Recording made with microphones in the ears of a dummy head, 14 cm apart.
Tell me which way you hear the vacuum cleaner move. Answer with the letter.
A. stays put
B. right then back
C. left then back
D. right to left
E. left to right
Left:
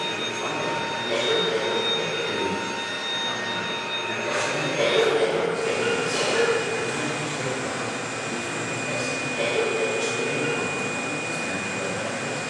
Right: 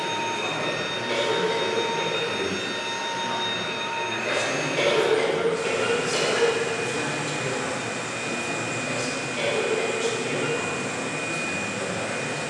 A.